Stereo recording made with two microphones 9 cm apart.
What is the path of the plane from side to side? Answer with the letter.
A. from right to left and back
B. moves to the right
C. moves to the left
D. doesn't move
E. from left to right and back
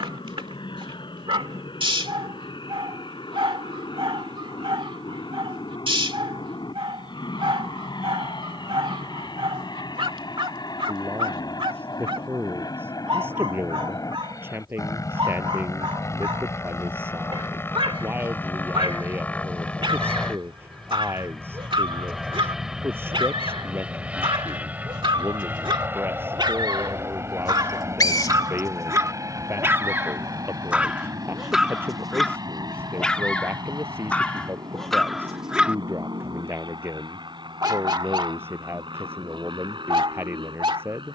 B.